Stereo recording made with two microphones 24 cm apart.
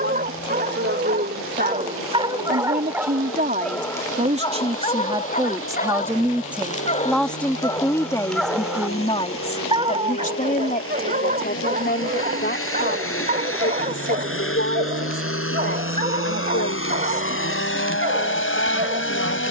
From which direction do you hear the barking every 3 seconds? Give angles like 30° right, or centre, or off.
30° right, 20° left, 20° left, 30° right, 40° right, 40° right, 40° right.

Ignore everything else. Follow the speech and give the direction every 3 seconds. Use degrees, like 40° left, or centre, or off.
50° right, 30° right, 10° left, 30° left, 50° left, 60° left, 70° left.